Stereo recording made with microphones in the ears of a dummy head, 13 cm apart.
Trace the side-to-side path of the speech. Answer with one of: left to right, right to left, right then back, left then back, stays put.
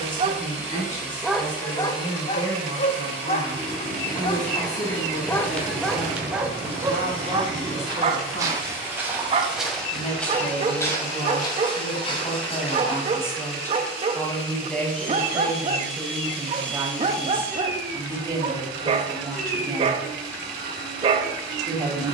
left to right.